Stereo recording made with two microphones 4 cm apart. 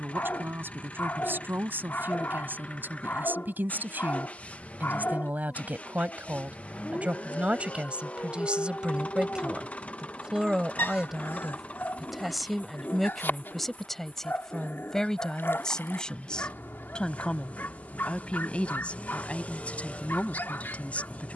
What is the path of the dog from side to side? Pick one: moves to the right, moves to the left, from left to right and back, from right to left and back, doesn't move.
doesn't move.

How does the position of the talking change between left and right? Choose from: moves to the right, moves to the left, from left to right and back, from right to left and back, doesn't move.
moves to the left.